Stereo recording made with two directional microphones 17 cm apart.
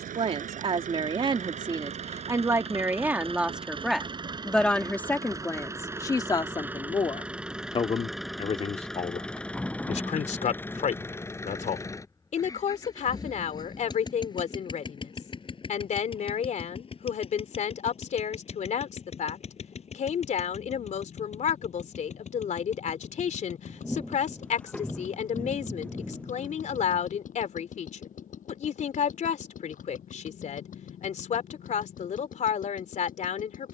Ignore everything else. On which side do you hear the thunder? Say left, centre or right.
centre.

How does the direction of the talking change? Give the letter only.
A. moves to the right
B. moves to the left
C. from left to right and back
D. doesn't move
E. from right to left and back
B.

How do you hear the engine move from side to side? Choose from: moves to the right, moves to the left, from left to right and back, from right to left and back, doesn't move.
moves to the left.